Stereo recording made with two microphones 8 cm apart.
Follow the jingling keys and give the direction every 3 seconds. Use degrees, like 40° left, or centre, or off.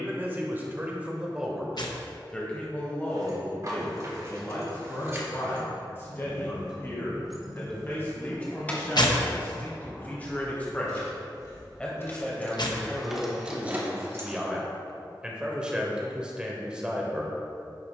off, 40° right, centre, 40° left, 10° right, off.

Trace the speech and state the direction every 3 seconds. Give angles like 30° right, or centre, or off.
10° right, 30° left, 30° left, 20° left, centre, 10° right.